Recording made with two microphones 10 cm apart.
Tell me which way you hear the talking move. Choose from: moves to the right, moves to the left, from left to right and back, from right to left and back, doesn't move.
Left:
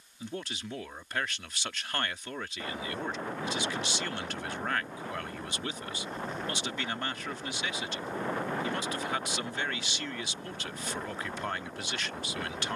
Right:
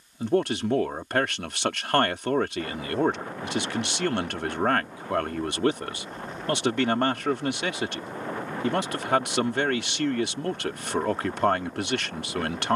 doesn't move.